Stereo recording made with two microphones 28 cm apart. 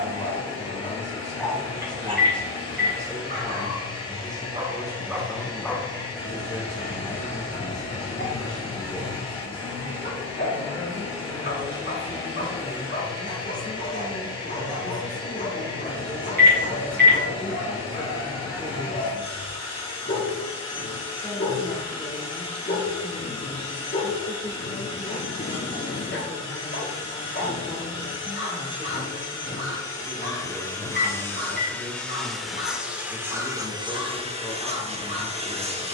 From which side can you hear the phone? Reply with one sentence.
In this clip you hear the phone on the right.